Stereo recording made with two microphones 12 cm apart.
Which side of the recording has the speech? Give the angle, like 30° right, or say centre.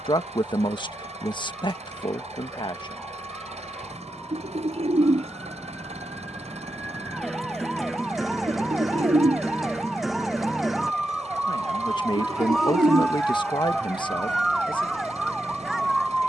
40° left.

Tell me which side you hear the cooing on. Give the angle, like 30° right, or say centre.
70° right.